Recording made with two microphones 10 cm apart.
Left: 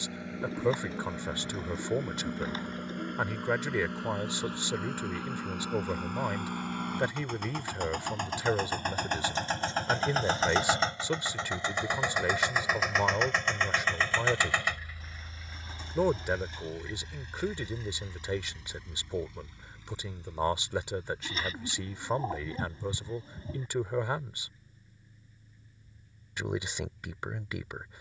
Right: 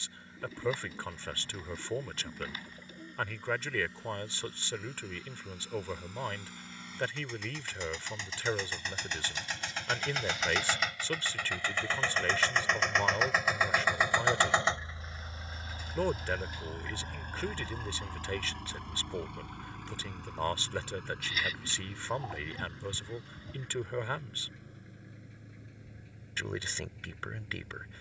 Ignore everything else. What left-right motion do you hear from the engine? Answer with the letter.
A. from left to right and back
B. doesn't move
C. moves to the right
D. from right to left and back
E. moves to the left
C.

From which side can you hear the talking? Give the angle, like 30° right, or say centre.
20° left.